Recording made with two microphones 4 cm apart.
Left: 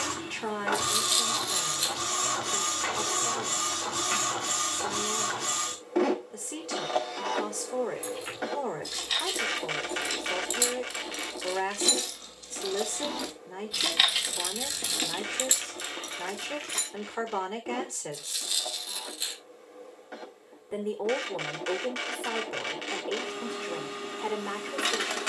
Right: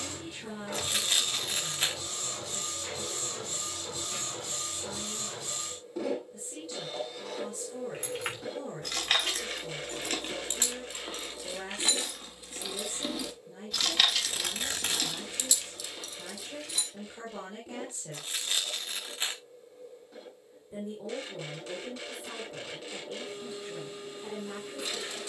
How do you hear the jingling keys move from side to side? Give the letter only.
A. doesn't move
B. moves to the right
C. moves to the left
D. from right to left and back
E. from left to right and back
C.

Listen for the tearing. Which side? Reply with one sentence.
You can hear the tearing on the right.